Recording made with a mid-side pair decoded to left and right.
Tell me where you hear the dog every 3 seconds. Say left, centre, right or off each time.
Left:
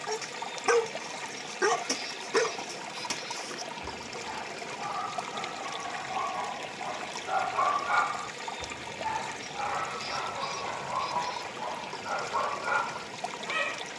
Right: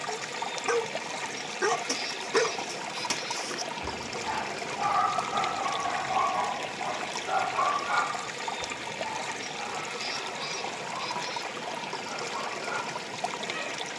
centre, right, centre, left, left.